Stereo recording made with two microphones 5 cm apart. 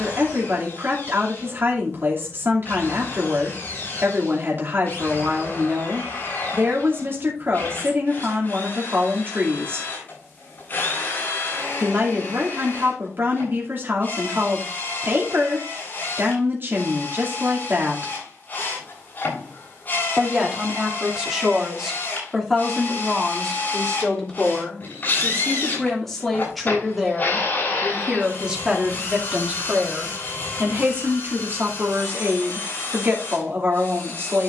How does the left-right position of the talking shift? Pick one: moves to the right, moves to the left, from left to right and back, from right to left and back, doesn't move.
from right to left and back.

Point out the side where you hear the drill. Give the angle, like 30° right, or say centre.
40° left.